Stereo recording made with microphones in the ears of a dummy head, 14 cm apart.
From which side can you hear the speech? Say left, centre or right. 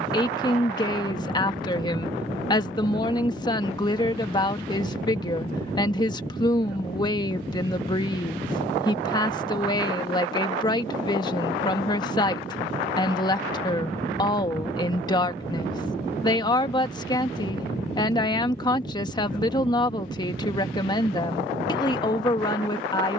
left.